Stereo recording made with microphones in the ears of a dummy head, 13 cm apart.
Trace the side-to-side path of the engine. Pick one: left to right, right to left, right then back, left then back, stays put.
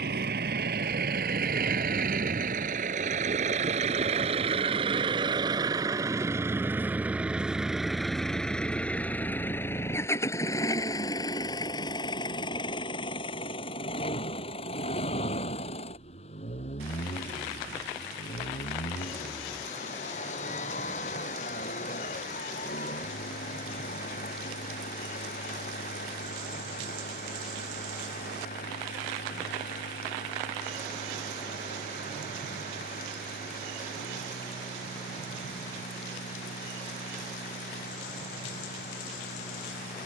right to left.